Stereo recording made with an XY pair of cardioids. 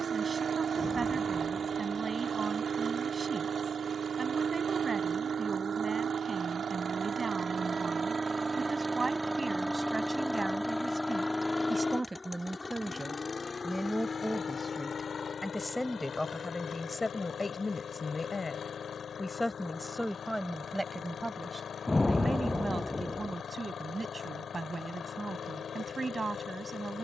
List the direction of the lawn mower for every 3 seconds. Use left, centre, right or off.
right, right, right, centre, left, left, left, left, left.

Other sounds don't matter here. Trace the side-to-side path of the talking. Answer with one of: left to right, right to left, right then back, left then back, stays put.
left then back.